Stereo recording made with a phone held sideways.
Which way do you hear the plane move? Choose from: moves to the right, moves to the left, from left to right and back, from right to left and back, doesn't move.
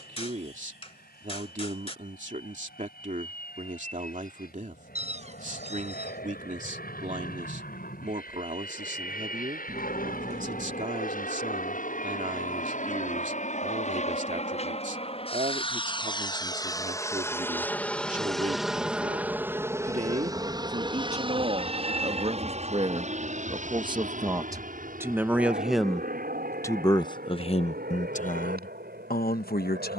moves to the right.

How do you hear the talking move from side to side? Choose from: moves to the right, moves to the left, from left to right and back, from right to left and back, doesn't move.
moves to the left.